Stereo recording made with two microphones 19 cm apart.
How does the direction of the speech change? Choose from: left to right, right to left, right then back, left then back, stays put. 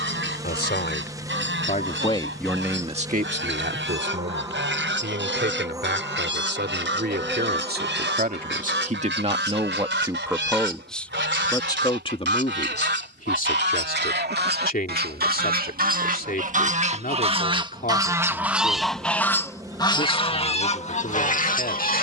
right then back.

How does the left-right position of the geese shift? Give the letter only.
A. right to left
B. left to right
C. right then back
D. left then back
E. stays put
A.